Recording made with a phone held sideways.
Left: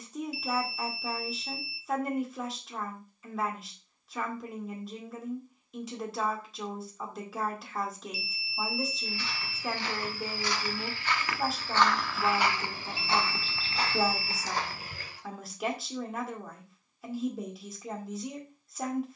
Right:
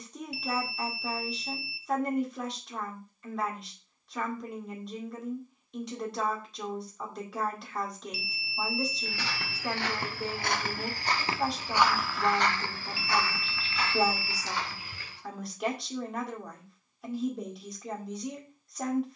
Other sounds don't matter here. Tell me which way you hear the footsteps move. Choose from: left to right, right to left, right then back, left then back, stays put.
right to left.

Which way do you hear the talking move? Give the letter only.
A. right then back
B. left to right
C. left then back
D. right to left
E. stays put
E.